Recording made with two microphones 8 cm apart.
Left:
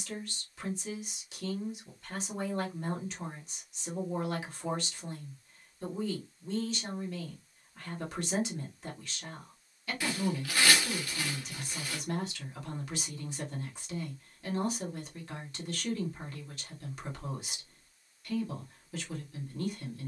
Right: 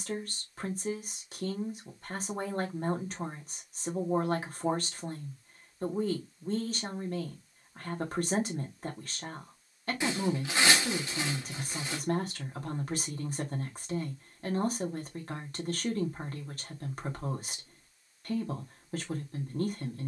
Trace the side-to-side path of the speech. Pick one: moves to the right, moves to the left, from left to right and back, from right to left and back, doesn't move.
doesn't move.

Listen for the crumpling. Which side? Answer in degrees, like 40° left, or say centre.
20° right.